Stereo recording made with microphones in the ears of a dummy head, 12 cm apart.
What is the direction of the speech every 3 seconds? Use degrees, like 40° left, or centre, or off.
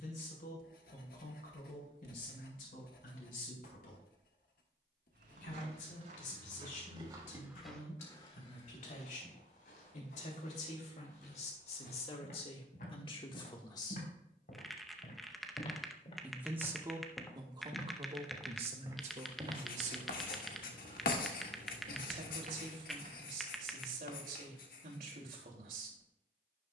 70° left, 70° left, 60° left, 50° left, 40° left, 20° right, 50° right, 70° right, 70° right.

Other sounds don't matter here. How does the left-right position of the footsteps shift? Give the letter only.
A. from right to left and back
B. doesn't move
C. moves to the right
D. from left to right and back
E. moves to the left
A.